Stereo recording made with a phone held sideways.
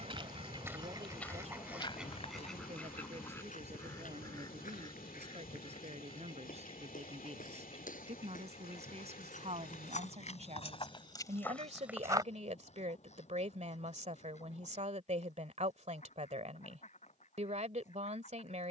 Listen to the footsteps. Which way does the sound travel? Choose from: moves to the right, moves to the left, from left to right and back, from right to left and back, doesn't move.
from right to left and back.